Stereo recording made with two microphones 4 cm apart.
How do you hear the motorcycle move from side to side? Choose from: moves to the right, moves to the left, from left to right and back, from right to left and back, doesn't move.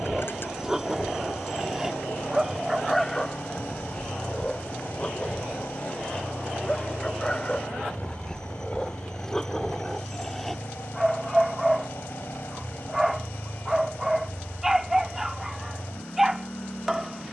doesn't move.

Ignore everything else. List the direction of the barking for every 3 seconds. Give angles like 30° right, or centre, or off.
10° right, 20° left, 20° left, 10° left, 10° right, 10° right.